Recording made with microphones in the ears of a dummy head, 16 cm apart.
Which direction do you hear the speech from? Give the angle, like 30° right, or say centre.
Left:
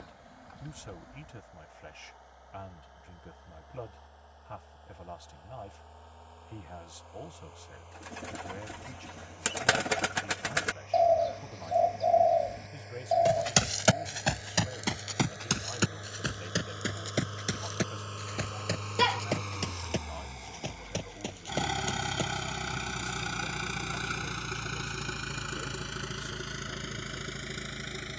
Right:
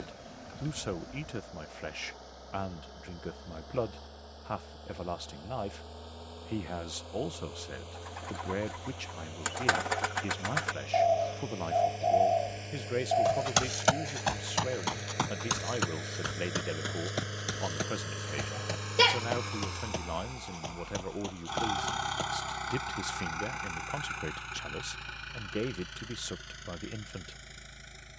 70° right.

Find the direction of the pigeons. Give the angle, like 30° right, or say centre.
30° left.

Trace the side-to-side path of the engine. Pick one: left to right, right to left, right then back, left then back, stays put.
right to left.